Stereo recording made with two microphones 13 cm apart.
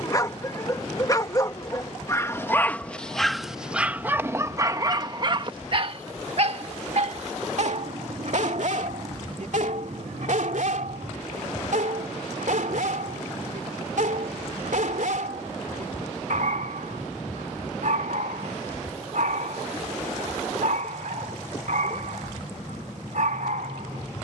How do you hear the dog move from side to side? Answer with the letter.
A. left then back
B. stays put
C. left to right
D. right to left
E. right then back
C.